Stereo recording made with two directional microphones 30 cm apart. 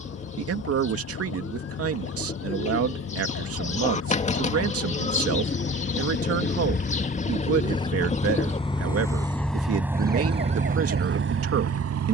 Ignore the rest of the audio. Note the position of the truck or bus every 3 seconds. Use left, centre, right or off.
left, left, left, right.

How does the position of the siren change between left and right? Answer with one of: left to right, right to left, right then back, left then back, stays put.
left to right.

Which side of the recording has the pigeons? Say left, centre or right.
left.